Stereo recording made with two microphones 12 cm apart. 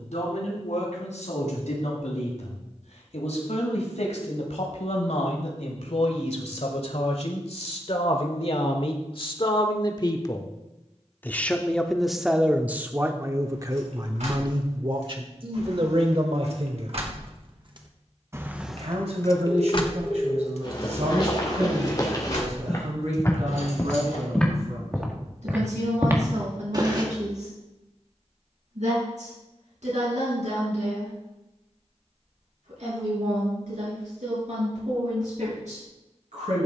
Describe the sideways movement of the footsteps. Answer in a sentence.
You can hear the footsteps move from left to right.